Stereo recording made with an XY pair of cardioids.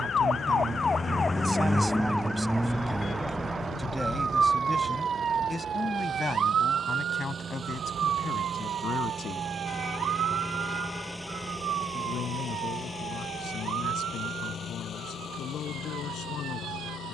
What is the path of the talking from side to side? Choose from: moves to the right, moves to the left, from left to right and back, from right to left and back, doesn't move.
moves to the left.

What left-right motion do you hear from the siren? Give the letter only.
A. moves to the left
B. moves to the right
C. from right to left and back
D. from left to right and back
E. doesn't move
B.